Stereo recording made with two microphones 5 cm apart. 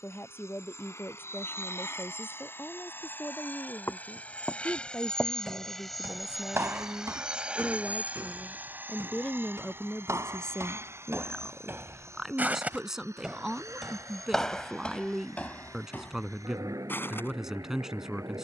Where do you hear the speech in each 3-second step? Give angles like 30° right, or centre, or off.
40° left, 40° left, 30° left, 10° left, 10° right, 10° right.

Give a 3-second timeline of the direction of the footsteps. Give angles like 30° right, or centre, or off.
off, centre, 70° right, 60° right, 10° right, 30° left.